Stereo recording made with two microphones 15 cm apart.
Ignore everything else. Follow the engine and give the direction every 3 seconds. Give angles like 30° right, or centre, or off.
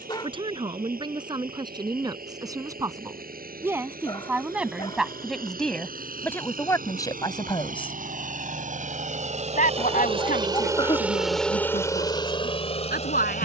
80° right, 80° right, 70° right, 20° right, 40° left.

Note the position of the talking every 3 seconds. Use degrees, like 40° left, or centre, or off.
30° right, 10° right, 20° left, 70° left, 80° left.